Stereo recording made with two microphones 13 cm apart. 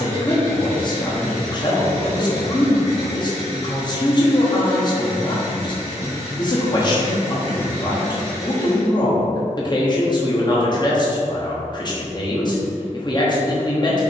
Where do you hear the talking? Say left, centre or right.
left.